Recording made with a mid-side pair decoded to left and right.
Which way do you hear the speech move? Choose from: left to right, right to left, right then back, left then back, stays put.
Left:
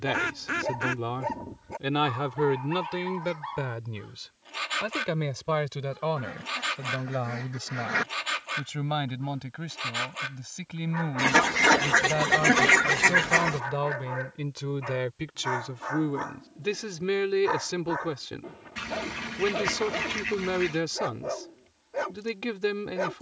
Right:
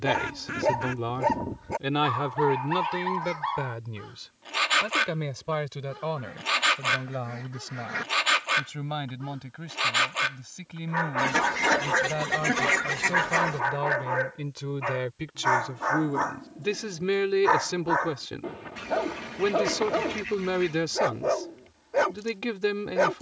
left then back.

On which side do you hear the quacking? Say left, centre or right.
left.